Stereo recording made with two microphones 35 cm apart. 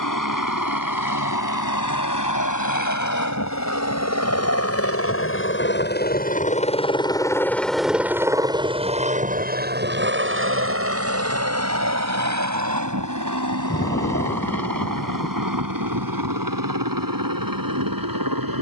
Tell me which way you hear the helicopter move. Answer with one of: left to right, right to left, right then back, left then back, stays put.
left to right.